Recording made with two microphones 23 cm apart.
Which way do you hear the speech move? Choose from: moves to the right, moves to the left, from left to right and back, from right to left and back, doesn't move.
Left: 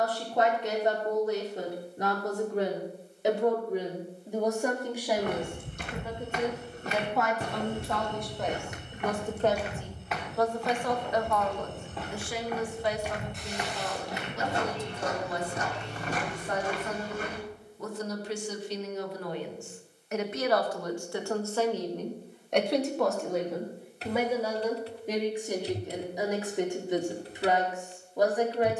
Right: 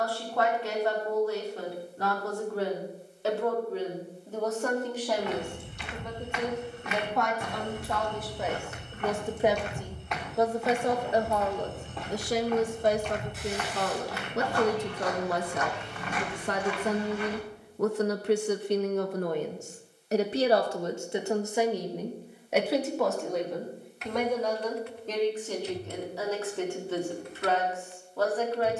from left to right and back.